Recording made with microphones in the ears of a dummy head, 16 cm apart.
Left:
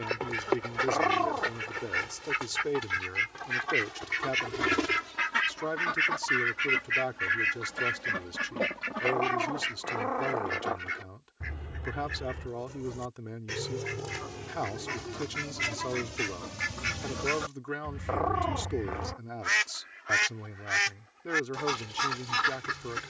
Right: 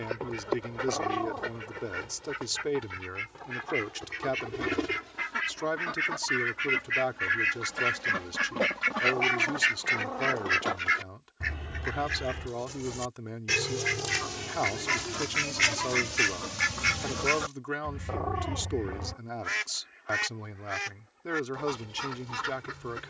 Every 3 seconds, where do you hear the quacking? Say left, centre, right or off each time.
left, left, centre, right, right, right, left, left.